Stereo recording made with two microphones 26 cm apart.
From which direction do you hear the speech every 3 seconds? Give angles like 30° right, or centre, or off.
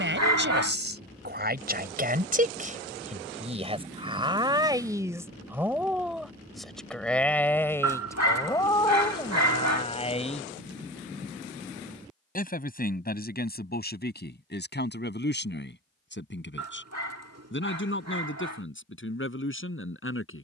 40° right, 20° right, 10° left, 20° left, 40° left, 50° left, 50° left.